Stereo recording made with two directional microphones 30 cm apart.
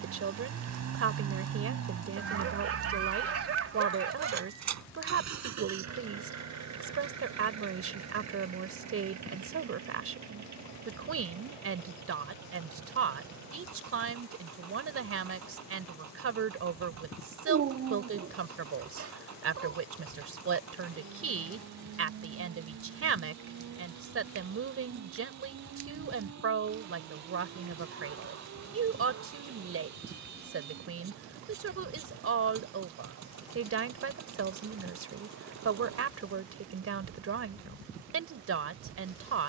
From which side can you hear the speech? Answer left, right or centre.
right.